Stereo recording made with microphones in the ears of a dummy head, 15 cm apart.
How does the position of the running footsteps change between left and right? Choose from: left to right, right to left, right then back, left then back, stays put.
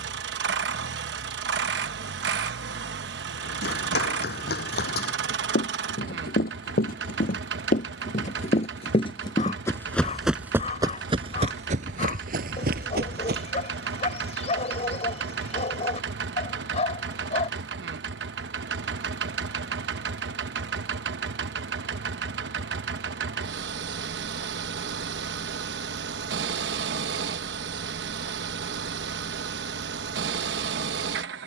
left to right.